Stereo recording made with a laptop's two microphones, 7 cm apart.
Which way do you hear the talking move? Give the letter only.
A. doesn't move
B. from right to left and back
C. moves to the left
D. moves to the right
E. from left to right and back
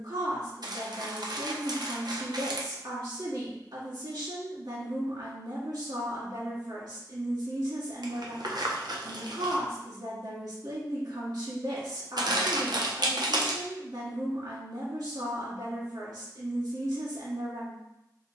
A.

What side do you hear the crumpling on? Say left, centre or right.
right.